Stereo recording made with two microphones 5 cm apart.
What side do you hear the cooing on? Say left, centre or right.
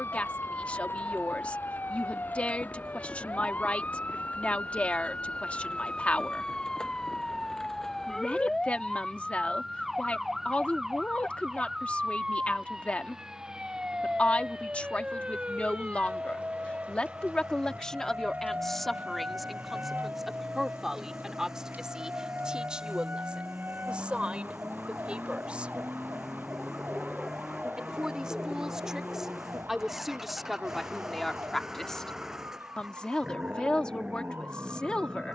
centre.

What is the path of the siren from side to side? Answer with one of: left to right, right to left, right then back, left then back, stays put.
left to right.